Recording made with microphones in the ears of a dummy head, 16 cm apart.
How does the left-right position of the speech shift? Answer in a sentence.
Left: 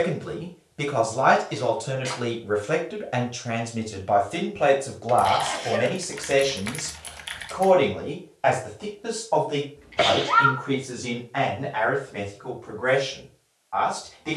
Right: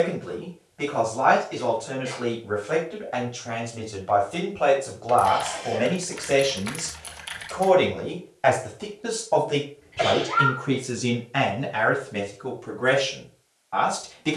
In this clip you hear the speech travel towards the right.